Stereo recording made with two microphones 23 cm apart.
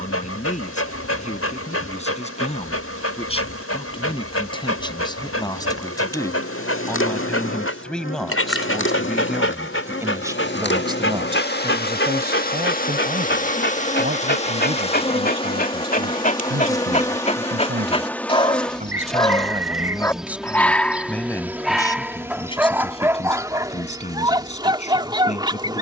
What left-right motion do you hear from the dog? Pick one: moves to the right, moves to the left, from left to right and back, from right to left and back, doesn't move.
moves to the right.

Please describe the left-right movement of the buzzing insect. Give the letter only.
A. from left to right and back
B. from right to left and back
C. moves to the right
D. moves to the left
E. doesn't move
C.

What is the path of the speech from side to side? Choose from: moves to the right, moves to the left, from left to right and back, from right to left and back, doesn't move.
from left to right and back.